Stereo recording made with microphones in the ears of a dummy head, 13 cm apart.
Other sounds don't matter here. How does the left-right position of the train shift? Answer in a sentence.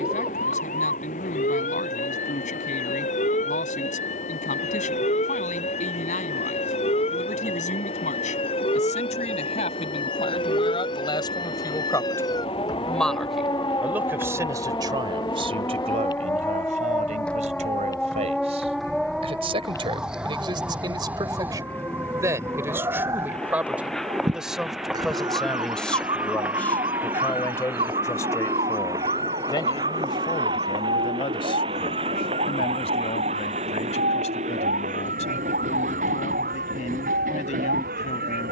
In this clip you hear the train move from left to right.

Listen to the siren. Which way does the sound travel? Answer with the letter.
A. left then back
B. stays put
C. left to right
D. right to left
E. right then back
C.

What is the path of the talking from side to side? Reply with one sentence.
In this clip you hear the talking go right and come back.